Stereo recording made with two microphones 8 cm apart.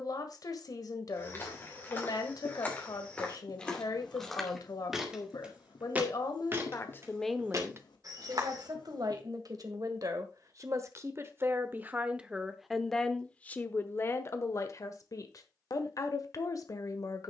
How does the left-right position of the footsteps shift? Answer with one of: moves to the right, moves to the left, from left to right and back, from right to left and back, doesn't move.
moves to the right.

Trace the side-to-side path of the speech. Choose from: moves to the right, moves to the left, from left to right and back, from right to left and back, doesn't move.
from left to right and back.